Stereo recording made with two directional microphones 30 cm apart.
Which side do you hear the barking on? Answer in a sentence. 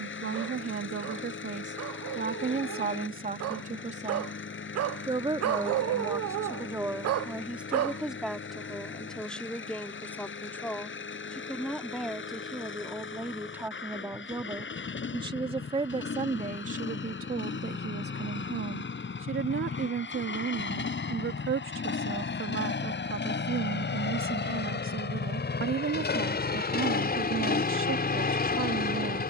You can hear the barking on the right.